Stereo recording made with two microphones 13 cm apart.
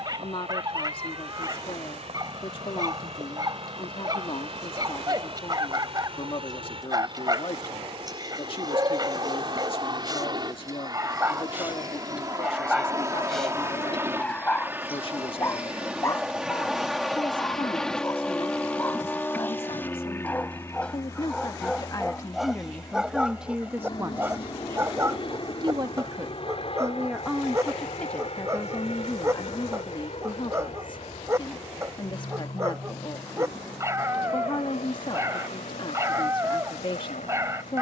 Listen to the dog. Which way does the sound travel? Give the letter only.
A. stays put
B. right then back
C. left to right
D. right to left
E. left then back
E.